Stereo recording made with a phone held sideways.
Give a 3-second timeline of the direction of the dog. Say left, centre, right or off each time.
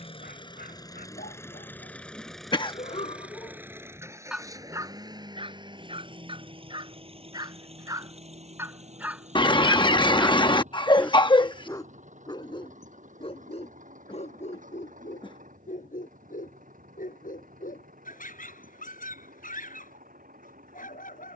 left, centre, right, centre, left, left, left.